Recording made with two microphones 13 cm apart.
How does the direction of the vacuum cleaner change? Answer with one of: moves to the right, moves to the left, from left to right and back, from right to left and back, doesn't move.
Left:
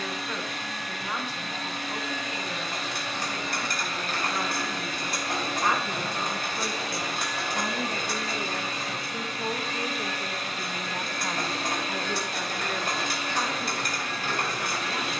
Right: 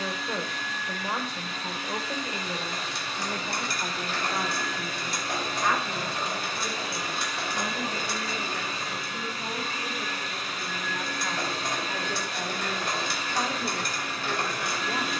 doesn't move.